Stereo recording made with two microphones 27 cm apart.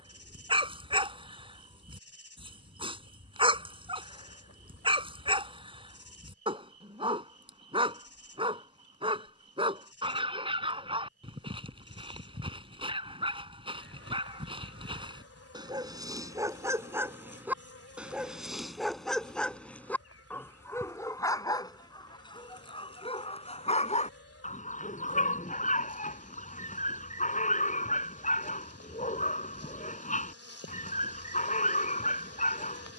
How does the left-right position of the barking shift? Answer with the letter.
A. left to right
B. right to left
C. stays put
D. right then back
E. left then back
B.